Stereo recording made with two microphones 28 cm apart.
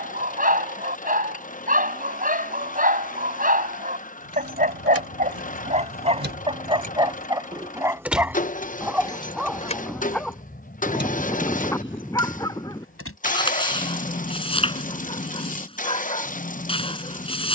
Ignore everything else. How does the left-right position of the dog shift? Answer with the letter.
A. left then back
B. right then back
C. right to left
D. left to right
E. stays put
C.